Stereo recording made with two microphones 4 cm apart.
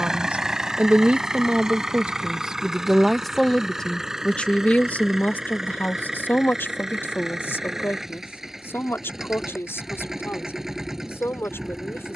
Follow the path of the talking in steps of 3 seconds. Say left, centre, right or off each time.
right, left, left, left.